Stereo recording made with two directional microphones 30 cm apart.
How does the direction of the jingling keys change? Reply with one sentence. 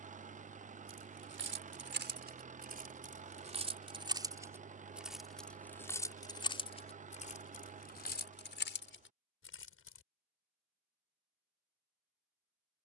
You can hear the jingling keys travel towards the left.